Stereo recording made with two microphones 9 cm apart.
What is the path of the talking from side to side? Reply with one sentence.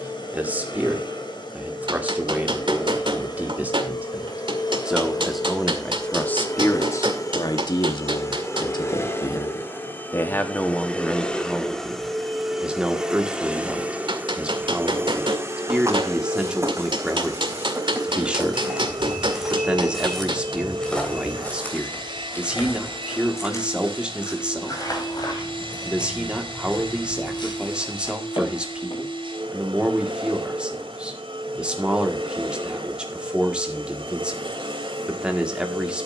You can hear the talking move from right to left and back again.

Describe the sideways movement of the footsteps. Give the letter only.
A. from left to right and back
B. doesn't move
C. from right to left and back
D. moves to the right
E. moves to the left
E.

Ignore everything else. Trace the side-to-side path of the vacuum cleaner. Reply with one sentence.
In this clip you hear the vacuum cleaner travel towards the right.